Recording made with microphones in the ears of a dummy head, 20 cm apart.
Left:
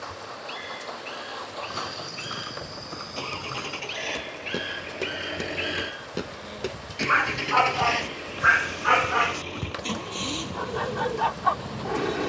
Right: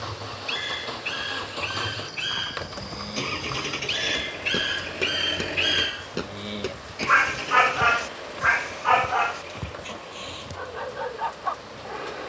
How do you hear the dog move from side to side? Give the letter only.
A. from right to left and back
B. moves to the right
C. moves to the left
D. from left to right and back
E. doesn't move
C.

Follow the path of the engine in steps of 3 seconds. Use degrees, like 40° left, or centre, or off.
40° right, 10° right, 30° left, 60° left.